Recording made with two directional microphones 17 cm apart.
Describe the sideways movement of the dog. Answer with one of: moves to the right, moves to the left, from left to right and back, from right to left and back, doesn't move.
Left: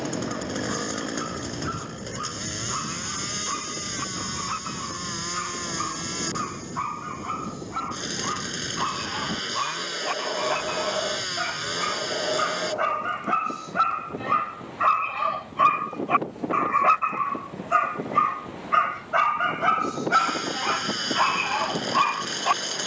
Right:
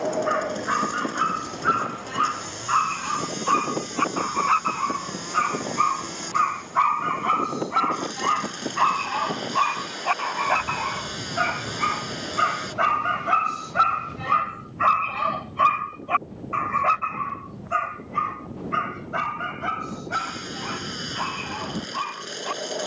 moves to the left.